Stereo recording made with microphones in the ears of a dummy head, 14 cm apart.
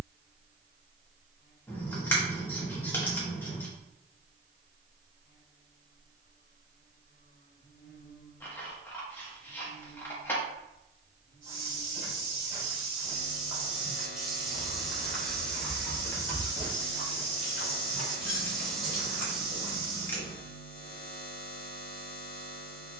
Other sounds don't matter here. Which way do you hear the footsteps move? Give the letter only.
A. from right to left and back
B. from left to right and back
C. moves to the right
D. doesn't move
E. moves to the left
A.